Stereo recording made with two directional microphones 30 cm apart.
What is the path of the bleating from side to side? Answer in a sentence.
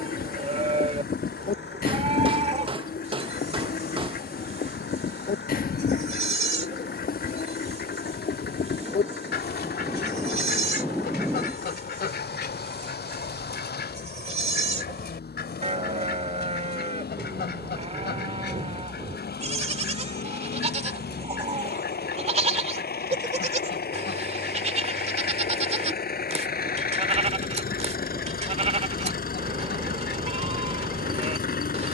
You can hear the bleating stay put.